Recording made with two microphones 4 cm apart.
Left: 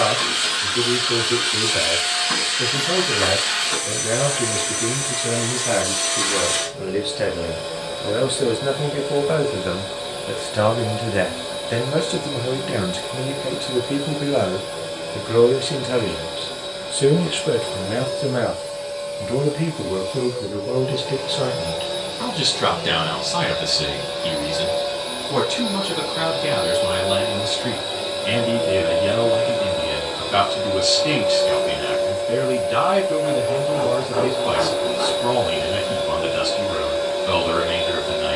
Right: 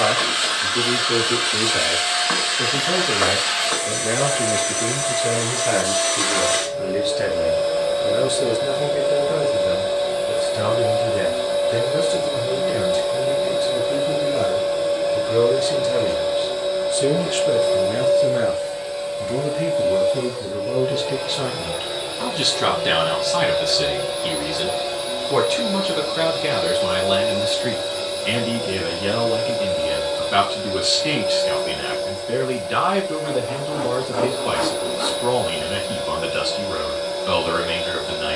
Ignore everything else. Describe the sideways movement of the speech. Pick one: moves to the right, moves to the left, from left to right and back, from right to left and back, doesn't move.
from right to left and back.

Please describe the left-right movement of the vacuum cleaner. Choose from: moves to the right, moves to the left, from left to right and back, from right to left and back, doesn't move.
moves to the left.